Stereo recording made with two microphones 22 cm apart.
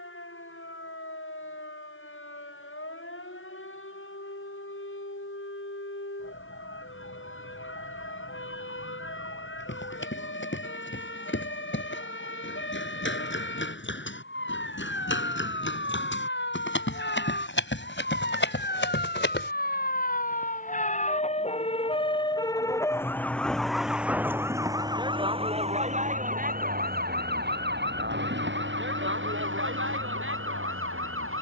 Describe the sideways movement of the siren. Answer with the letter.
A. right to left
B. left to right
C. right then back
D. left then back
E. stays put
B.